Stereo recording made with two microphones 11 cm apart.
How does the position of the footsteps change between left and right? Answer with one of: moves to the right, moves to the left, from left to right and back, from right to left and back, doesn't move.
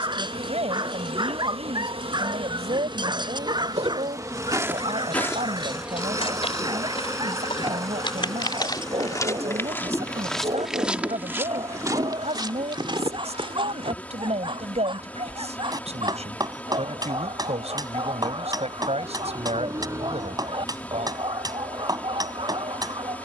from right to left and back.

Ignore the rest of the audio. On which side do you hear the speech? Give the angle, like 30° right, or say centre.
70° right.